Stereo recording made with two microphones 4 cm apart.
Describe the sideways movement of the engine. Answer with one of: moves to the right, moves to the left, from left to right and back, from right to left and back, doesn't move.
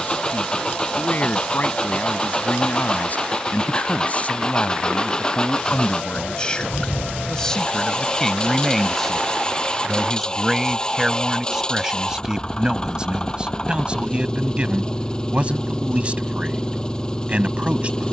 doesn't move.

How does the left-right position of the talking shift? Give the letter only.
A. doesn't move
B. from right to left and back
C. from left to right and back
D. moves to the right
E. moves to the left
D.